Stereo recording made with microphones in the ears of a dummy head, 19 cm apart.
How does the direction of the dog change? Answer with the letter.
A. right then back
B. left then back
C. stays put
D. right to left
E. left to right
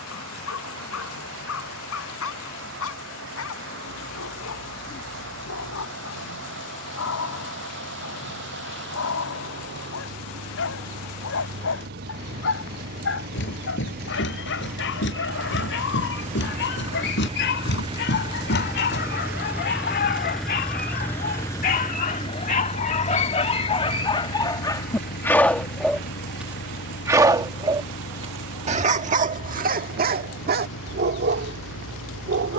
E.